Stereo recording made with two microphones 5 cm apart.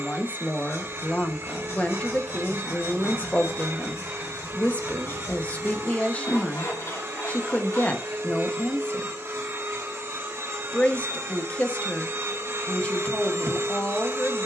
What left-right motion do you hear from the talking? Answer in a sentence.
You can hear the talking stay put.